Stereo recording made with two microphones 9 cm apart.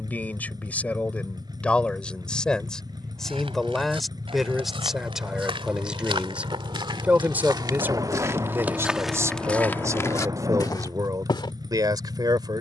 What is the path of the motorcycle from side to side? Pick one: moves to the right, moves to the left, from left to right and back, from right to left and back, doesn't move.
doesn't move.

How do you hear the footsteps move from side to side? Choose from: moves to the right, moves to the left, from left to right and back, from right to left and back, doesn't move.
moves to the left.